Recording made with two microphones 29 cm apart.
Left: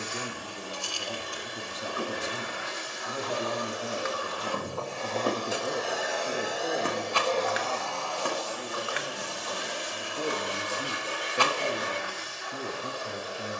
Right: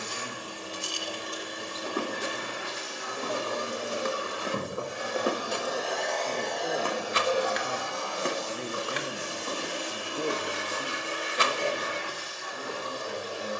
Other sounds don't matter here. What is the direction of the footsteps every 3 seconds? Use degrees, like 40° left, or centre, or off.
70° right, 30° right, 10° right, 60° right, off.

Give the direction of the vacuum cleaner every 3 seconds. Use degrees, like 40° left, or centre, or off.
40° right, 20° right, 10° right, 40° right, 40° right.